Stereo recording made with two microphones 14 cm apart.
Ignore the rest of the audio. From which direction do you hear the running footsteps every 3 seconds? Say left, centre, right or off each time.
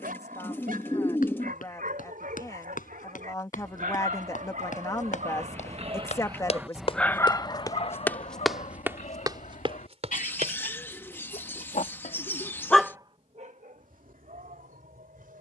left, left, left, right, off.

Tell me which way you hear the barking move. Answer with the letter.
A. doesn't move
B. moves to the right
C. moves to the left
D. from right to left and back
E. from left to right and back
D.